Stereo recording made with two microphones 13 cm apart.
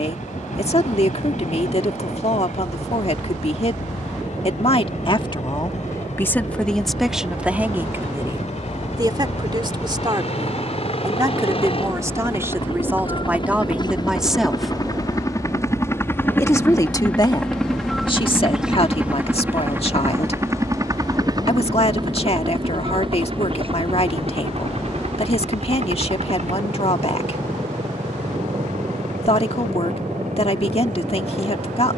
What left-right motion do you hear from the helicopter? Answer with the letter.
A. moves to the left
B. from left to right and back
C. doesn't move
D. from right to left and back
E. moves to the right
E.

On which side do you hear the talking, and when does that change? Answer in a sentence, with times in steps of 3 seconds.
You can hear the talking on the left from 0 s, in the centre from 6 s, on the right from 9 s, in the centre from 12 s and on the left from 15 s.